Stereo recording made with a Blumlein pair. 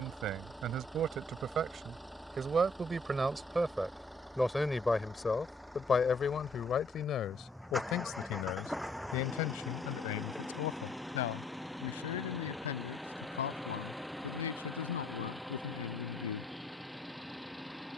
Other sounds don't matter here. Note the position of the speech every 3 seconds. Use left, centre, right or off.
right, centre, left, left, left, left.